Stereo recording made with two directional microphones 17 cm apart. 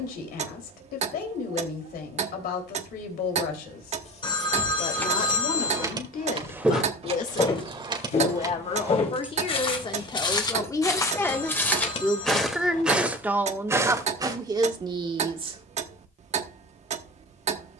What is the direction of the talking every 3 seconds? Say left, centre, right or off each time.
left, left, left, left, centre, right.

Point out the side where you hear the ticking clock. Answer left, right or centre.
right.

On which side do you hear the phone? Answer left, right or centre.
left.